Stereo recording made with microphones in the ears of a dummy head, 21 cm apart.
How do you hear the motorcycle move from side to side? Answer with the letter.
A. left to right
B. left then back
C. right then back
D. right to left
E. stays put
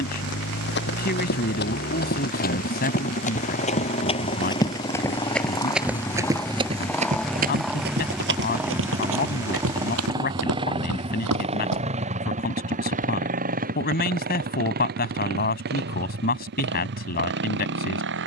A.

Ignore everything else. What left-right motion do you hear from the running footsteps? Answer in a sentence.
You can hear the running footsteps move to the right.